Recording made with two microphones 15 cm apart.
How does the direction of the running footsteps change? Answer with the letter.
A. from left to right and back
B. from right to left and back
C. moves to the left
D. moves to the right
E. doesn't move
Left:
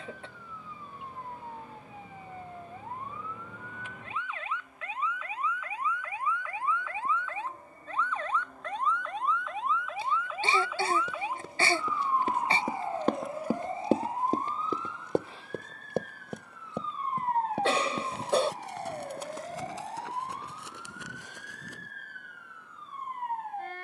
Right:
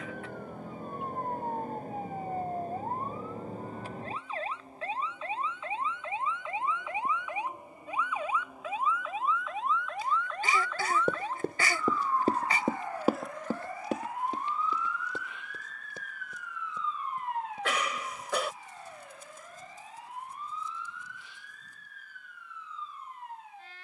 C.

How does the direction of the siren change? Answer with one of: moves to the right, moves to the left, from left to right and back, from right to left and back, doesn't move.
moves to the left.